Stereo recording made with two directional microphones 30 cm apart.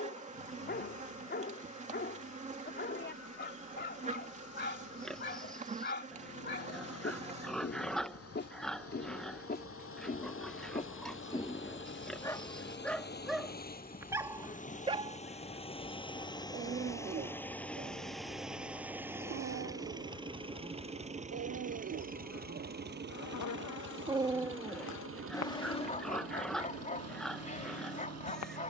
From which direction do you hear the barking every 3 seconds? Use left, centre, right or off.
left, left, left, left, centre, right, right, right, centre, left.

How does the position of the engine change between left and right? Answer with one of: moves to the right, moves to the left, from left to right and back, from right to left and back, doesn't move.
moves to the right.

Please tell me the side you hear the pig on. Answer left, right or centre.
centre.